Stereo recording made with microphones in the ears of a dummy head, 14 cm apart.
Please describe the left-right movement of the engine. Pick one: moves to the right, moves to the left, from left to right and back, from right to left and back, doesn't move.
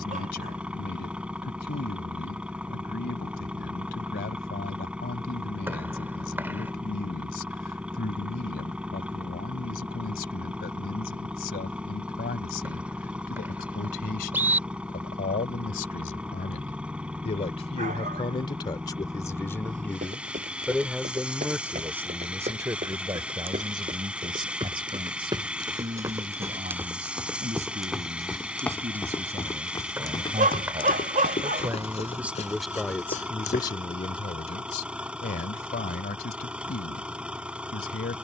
doesn't move.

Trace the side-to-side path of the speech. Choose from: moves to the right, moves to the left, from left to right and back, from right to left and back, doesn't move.
from left to right and back.